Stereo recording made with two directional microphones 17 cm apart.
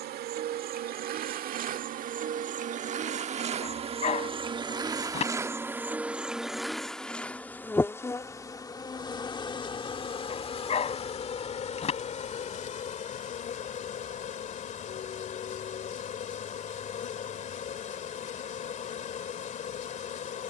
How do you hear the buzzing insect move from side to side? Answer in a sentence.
In this clip you hear the buzzing insect go from the right side to the left.